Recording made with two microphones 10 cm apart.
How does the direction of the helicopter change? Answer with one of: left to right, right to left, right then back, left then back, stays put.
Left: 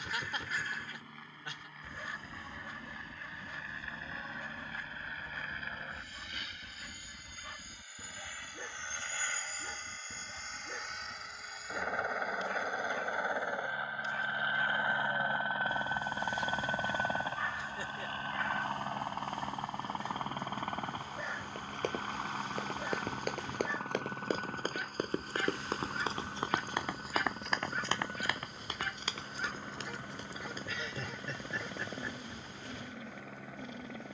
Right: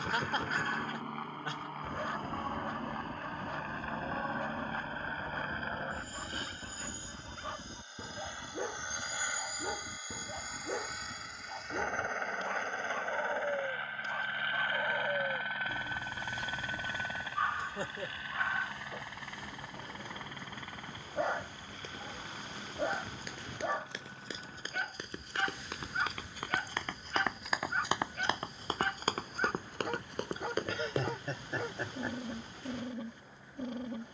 right to left.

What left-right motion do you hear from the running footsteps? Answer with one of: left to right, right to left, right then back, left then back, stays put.
left to right.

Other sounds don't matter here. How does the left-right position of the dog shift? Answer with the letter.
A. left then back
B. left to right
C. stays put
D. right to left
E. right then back
C.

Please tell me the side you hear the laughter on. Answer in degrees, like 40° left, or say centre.
40° right.